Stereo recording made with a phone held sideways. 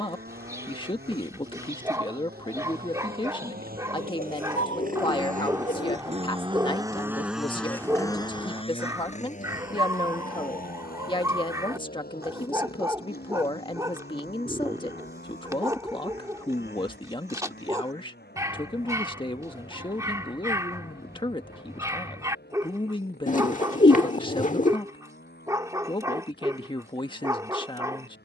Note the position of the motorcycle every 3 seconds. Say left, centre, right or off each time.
right, right, centre, left, left, left, left, left, left, left.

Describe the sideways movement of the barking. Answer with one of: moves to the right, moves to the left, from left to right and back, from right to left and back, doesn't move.
doesn't move.